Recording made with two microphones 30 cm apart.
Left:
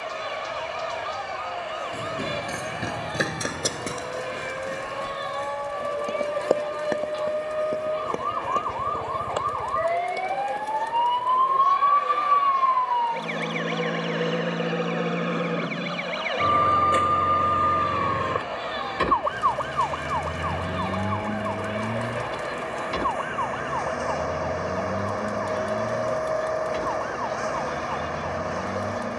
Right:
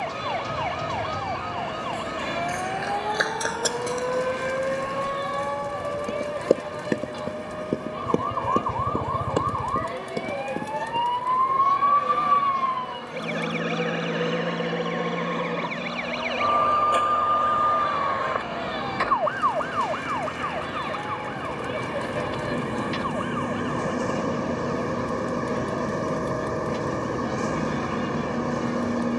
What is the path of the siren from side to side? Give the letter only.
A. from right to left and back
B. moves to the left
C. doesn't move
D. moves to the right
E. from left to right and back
B.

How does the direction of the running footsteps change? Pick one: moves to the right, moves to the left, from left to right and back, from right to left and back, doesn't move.
moves to the right.